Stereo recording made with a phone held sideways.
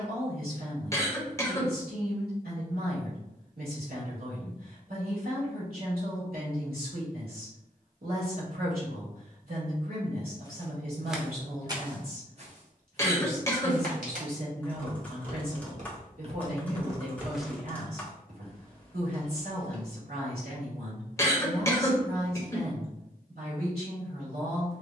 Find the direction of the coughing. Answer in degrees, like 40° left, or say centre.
20° left.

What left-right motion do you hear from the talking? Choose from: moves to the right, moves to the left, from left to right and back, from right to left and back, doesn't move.
doesn't move.